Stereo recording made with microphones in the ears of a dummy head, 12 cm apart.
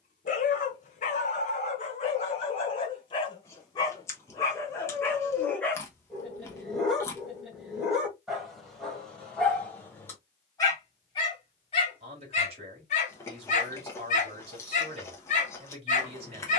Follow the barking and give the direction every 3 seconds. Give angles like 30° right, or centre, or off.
50° left, 20° left, centre, 20° left, 60° left, 60° left.